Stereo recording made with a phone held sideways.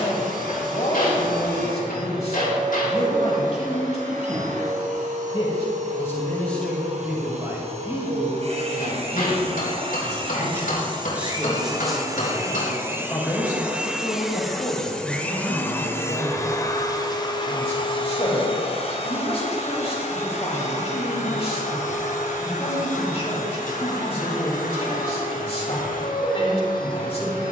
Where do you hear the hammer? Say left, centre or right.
left.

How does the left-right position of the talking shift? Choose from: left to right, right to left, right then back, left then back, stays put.
right then back.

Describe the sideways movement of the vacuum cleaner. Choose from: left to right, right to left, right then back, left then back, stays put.
right to left.